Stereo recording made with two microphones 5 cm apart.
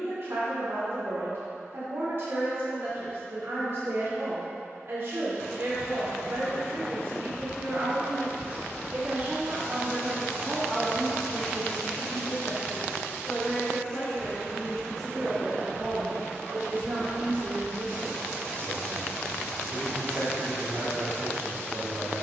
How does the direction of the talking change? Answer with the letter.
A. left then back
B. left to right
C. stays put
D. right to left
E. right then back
A.